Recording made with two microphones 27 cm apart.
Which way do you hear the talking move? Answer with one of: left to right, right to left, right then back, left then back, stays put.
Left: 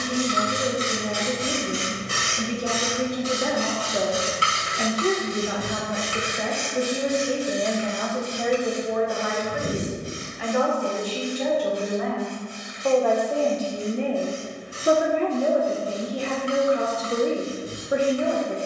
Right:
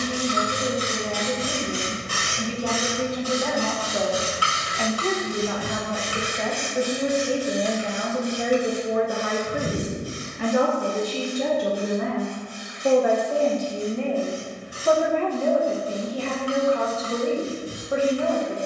right then back.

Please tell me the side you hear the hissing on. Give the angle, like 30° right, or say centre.
20° left.